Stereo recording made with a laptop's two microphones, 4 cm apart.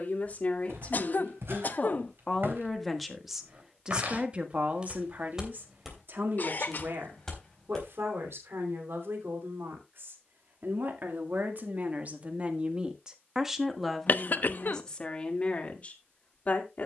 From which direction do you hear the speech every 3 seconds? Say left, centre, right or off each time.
left, right, right, right, centre, left.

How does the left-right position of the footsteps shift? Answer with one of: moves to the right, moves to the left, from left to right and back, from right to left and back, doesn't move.
moves to the left.